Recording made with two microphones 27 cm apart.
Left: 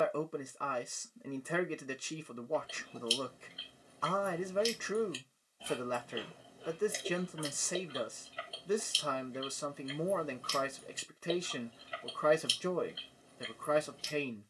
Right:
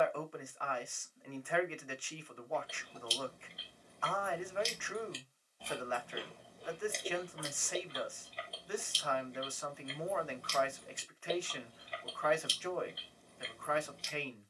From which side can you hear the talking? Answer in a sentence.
You can hear the talking on the left.